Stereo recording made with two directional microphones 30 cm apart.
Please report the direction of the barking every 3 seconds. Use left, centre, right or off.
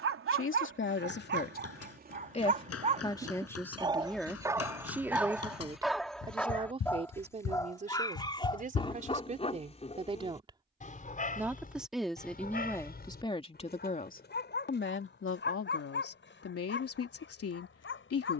right, centre, centre, left, left, left.